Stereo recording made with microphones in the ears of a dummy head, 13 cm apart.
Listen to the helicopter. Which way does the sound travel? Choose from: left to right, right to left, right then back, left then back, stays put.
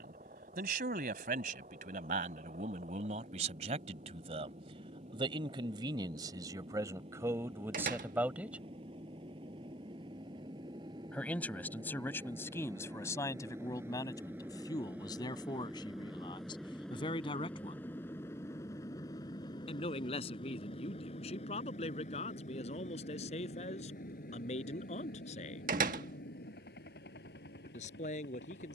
right to left.